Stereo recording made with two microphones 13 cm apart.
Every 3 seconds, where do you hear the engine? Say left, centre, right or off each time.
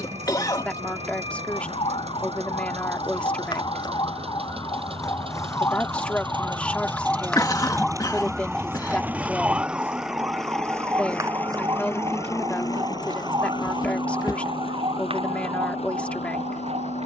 right, right, right, centre, left, left.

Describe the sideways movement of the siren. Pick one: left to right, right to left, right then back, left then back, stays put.
left to right.